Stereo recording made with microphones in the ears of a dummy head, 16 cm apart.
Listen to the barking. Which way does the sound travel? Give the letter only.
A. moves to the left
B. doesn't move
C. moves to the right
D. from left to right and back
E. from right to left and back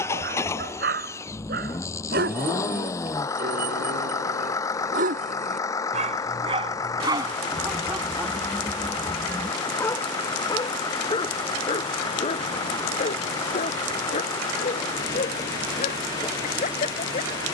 A.